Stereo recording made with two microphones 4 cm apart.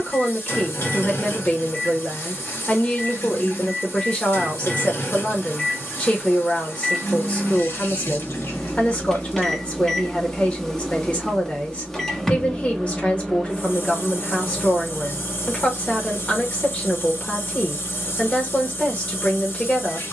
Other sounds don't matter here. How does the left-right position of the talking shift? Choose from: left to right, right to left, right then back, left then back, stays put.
stays put.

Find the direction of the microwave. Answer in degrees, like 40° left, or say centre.
10° left.